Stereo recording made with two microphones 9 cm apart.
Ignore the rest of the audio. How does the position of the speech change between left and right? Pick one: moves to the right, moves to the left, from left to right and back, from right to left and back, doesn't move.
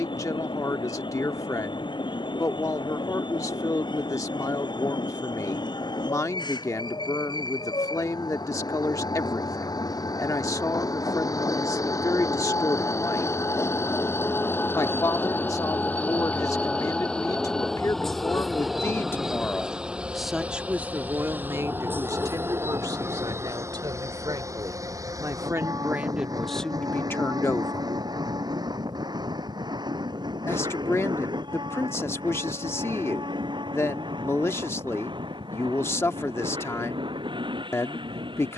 from left to right and back.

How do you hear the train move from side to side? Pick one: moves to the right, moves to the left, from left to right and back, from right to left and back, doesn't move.
moves to the right.